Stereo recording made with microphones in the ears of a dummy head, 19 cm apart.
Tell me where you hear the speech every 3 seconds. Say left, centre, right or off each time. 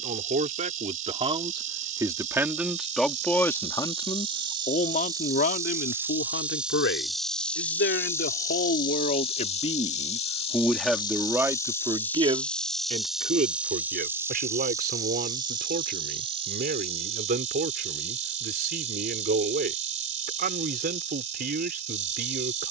right, left, left, centre, right, right, right, right.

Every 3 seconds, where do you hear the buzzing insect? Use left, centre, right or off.
right, right, centre, left, centre, right, right, right.